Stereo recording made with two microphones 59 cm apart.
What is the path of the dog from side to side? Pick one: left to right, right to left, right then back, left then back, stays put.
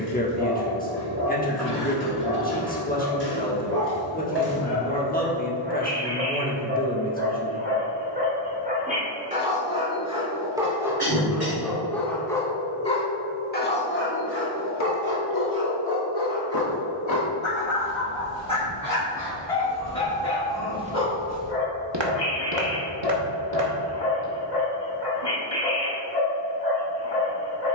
right to left.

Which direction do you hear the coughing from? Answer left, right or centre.
right.